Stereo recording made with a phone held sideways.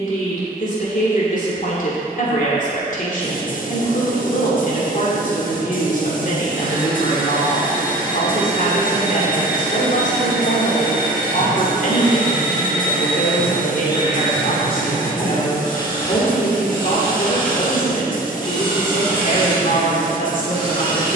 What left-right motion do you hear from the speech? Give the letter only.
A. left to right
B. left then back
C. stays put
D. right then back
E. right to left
C.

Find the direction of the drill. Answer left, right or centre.
left.